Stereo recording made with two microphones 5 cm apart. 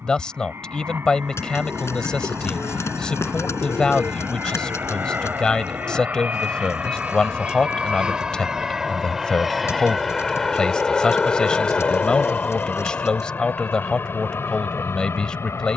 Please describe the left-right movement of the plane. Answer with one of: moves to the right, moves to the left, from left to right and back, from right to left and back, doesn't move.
moves to the left.